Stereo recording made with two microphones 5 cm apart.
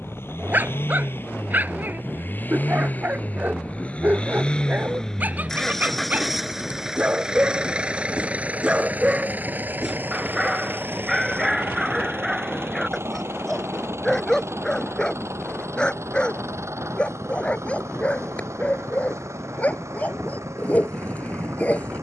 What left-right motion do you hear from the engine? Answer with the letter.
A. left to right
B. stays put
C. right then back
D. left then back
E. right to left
A.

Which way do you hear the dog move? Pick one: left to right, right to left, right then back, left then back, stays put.
right to left.